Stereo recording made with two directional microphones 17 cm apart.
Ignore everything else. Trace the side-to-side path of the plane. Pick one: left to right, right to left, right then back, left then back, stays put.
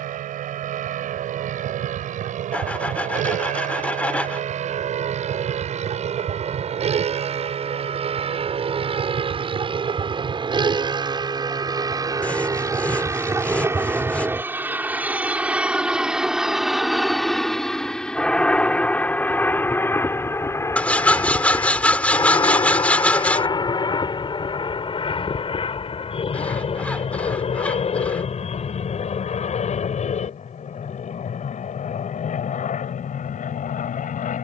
right to left.